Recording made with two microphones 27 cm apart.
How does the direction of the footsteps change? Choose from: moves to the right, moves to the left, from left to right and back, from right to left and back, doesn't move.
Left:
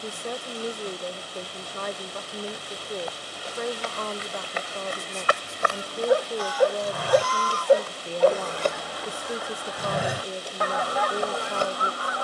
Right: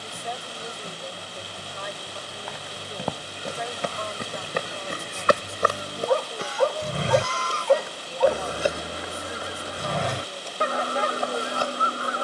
moves to the left.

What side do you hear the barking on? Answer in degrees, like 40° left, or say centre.
20° left.